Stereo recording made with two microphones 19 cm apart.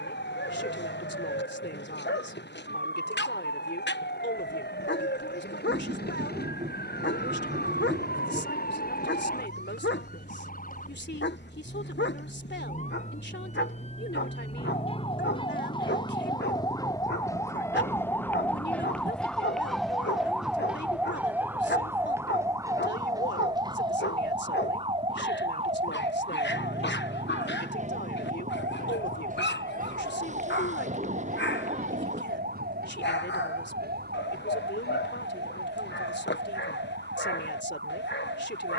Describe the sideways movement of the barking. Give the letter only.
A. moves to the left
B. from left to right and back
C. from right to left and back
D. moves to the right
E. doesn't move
E.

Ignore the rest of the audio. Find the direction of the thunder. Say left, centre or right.
right.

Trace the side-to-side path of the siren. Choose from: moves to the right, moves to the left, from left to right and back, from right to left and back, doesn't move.
moves to the right.